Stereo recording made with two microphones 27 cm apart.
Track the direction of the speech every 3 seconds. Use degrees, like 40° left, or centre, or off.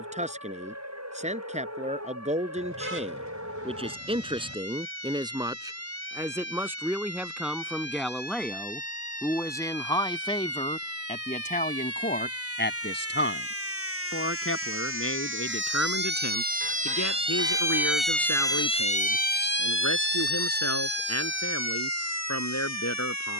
30° right, 20° right, centre, 20° left, 50° left, 70° left, 80° left, 80° left.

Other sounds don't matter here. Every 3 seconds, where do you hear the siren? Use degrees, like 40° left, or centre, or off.
70° right, 70° right, 70° right, 70° right, 60° right, 30° right, 40° left, 70° left.